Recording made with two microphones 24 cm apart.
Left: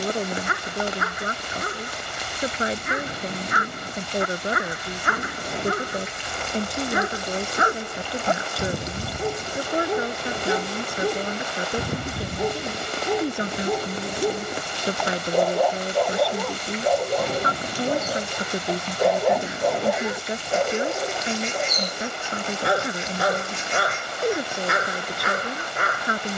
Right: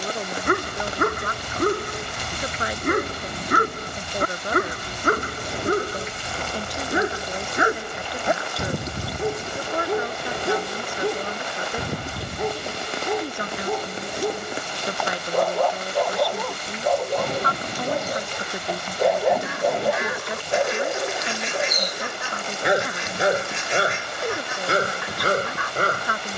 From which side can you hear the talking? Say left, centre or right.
left.